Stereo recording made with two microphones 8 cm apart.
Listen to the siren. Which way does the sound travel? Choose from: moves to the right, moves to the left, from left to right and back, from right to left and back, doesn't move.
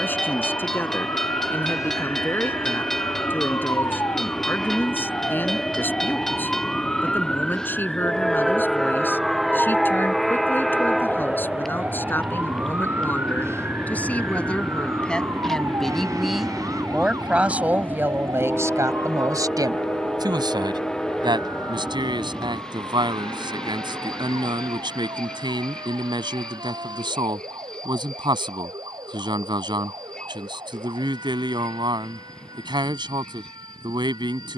moves to the right.